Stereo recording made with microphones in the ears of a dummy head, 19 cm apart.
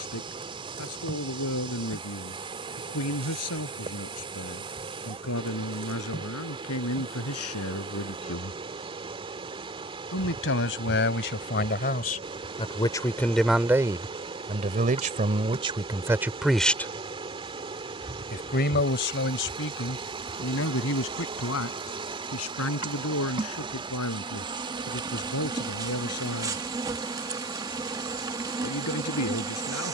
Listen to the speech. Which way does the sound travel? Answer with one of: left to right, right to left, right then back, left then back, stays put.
right then back.